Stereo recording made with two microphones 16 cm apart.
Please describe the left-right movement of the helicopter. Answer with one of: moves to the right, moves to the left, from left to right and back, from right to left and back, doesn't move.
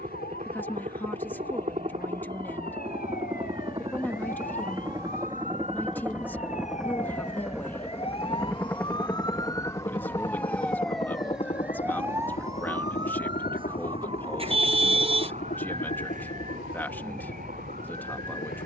moves to the left.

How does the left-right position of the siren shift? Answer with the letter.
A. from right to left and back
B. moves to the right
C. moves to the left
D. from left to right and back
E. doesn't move
B.